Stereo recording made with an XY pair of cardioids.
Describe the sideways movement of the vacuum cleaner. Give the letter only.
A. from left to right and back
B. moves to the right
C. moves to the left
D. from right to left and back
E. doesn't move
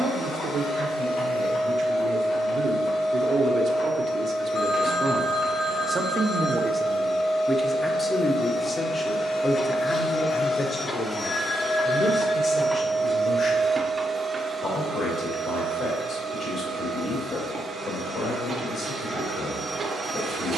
B.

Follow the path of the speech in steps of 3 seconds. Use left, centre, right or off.
right, right, centre, left, left, left, left.